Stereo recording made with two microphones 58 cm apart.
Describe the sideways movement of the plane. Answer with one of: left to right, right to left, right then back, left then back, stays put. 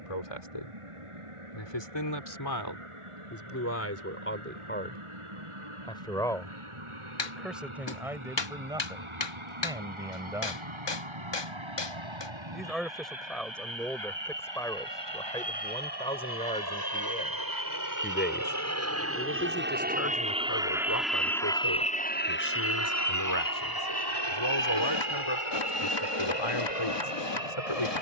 right to left.